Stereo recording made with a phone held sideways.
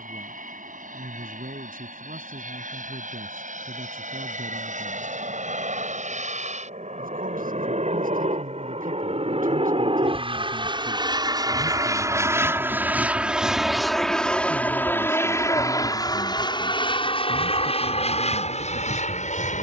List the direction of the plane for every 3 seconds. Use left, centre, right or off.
right, right, right, right, centre, left, left.